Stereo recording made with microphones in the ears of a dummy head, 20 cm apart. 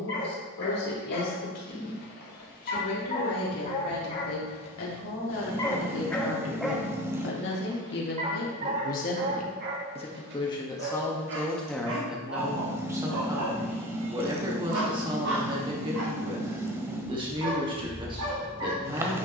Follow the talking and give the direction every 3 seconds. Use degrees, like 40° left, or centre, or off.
80° left, 70° left, 50° left, 20° left, 20° right, 20° right, 20° right.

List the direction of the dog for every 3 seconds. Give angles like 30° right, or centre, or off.
50° left, 30° left, 20° right, 50° right, 70° right, 80° right, 80° right.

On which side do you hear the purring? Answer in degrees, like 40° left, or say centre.
10° right.